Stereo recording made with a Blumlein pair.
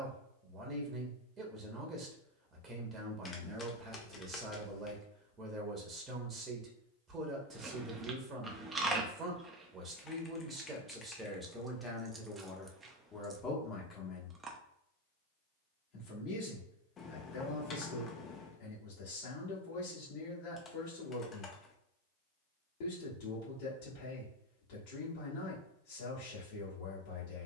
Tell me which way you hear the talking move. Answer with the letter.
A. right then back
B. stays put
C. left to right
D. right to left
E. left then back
D.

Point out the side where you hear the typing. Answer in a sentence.
You can hear the typing on the left.